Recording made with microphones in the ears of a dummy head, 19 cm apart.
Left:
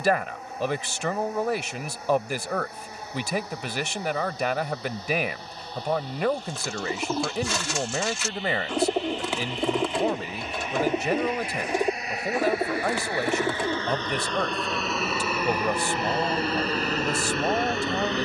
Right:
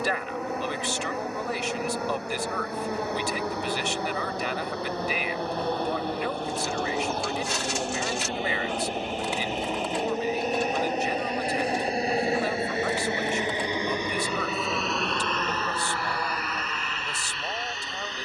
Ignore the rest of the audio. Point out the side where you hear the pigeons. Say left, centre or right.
left.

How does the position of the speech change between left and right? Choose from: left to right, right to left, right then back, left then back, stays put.
stays put.